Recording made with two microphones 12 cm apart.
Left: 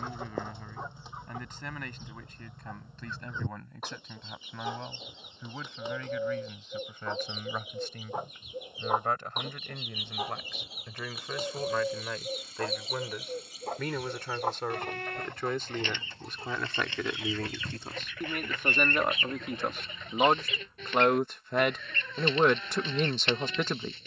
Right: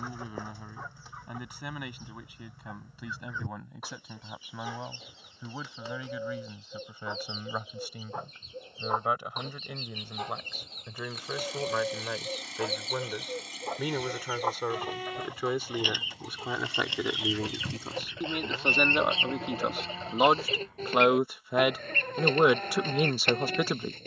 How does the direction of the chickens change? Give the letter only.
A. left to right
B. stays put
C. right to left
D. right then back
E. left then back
A.